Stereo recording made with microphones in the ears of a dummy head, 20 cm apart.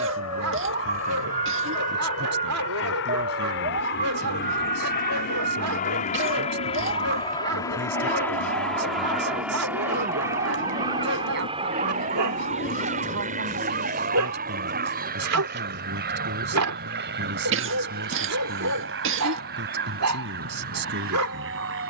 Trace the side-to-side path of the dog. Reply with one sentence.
In this clip you hear the dog stay in one place.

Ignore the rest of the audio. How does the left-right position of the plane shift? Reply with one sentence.
In this clip you hear the plane move to the right.